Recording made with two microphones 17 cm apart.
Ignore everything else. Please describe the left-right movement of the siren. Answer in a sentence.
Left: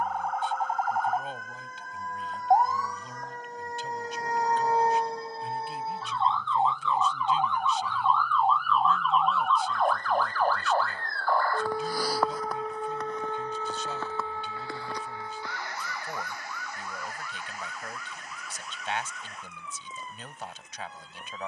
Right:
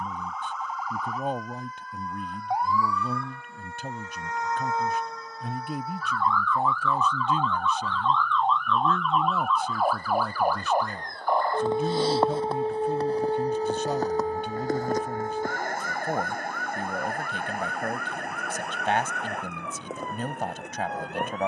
In this clip you hear the siren move to the right.